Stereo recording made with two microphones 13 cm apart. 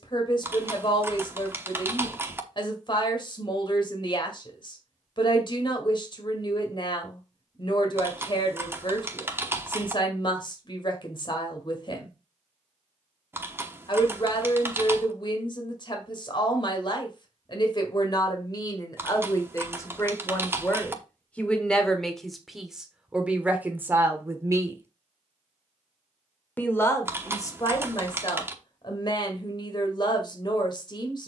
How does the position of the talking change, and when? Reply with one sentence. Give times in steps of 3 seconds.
You can hear the talking on the left from 0 s, in the centre from 21 s and on the left from 27 s.